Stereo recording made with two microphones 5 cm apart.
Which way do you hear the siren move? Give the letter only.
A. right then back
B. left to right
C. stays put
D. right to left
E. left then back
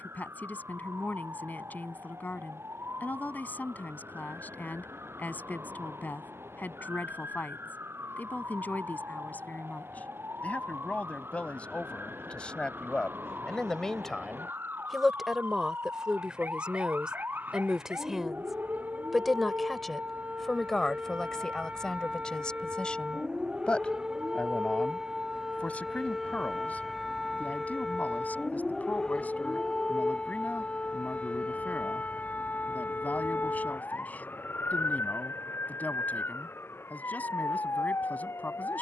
D.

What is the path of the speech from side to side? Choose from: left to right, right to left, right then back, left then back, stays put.
right then back.